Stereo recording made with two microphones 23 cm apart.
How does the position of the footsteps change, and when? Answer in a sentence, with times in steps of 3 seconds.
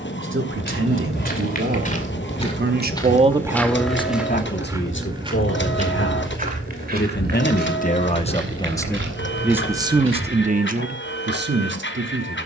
In this clip you hear the footsteps on the left from 0 s, in the centre from 3 s and on the right from 6 s.